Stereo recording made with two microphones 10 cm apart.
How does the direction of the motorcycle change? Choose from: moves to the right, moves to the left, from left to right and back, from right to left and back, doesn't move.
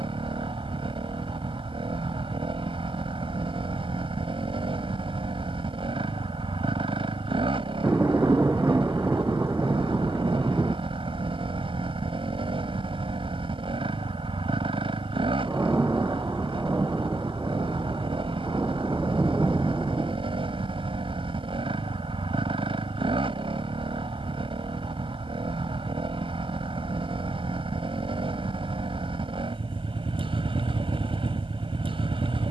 doesn't move.